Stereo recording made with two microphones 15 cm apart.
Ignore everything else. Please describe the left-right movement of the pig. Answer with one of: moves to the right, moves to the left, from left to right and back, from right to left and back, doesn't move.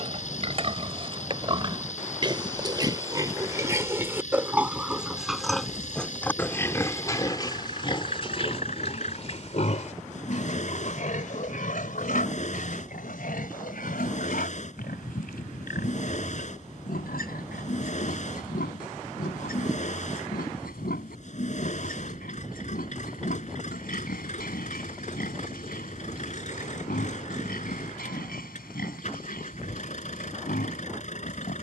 moves to the left.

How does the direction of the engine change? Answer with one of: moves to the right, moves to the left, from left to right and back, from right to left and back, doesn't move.
doesn't move.